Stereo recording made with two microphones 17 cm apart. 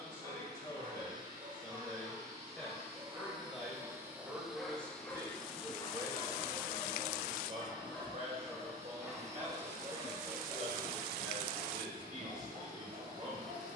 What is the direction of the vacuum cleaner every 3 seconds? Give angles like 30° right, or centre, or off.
50° right, 10° right, 20° right, 50° right, 60° right.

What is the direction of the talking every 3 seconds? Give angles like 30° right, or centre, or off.
10° left, 10° right, 40° right, 50° right, 50° right.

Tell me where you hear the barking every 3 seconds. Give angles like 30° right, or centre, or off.
30° right, centre, 10° left, 20° right, 40° right.